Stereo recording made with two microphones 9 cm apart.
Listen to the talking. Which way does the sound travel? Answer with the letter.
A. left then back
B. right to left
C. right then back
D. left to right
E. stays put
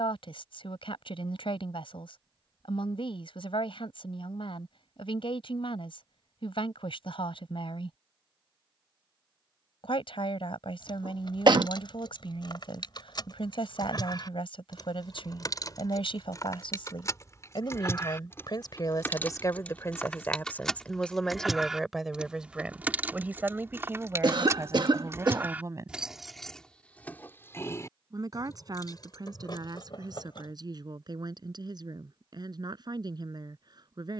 D.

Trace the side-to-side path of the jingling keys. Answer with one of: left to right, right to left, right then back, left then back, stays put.
right then back.